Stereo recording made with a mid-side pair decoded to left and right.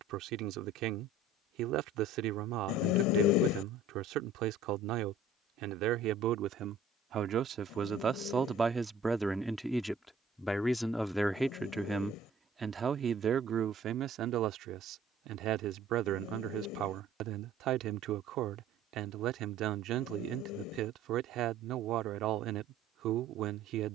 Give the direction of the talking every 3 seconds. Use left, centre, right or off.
right, right, right, centre, right, right, right, right.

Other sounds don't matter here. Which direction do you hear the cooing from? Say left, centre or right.
left.